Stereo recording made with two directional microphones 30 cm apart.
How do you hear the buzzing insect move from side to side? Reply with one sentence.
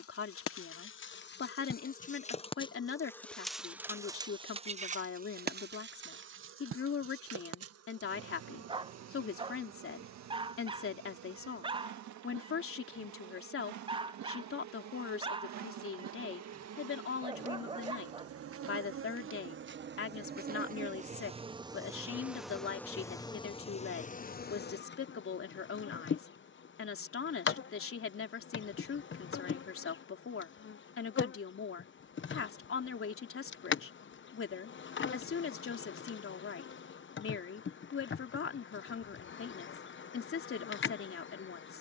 In this clip you hear the buzzing insect go right and come back.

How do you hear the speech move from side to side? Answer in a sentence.
In this clip you hear the speech stay put.